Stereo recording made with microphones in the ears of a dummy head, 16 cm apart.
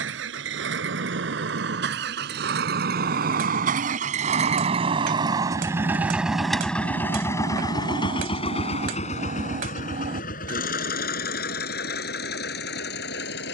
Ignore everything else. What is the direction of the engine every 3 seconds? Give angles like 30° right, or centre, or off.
60° right, 30° right, 20° left, 50° left, 60° left.